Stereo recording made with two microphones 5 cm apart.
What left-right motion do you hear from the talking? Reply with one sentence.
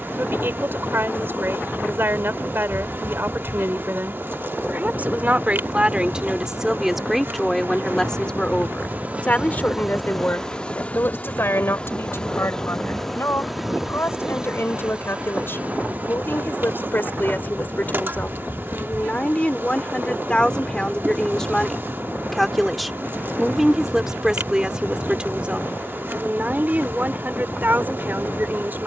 You can hear the talking go left and come back.